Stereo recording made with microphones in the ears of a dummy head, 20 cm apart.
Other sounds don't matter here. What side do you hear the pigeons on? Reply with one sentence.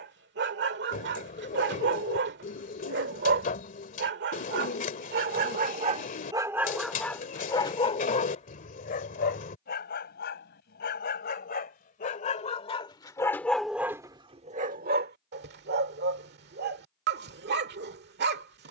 You can hear the pigeons on the left.